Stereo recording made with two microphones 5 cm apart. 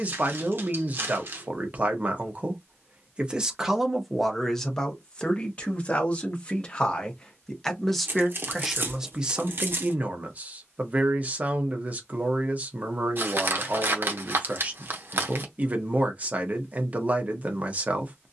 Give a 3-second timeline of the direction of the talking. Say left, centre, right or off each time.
right, centre, centre, right, right, right.